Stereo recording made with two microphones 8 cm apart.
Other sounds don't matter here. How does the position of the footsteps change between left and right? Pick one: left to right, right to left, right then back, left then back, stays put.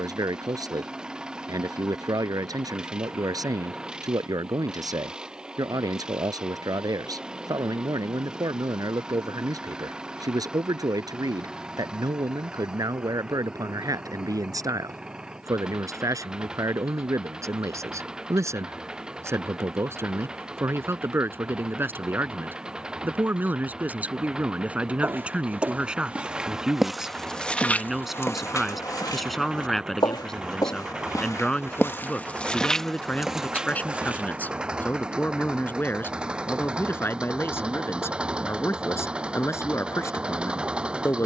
left then back.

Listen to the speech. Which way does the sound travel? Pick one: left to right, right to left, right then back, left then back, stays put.
right to left.